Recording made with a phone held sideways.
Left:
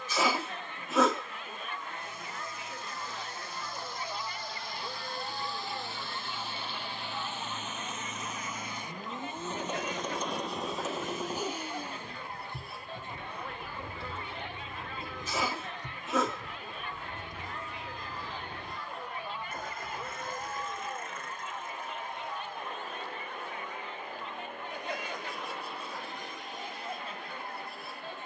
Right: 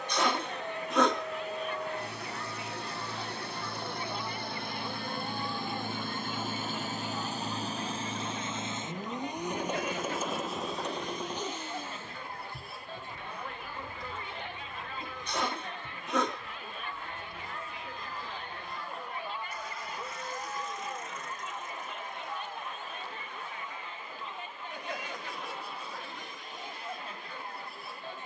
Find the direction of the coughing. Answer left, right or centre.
centre.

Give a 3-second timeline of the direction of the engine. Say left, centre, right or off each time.
right, right, right, centre, left, left, left, left, left, left.